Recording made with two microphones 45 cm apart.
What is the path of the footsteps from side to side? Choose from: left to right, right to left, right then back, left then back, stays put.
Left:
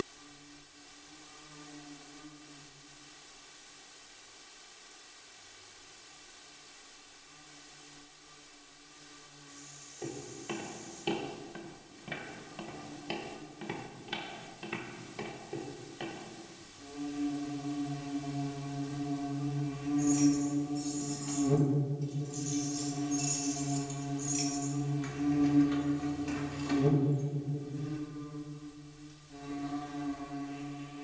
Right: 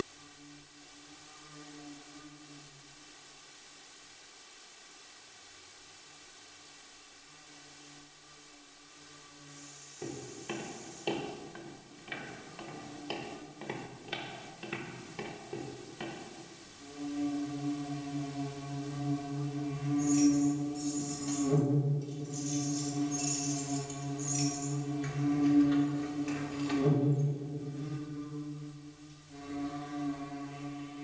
left then back.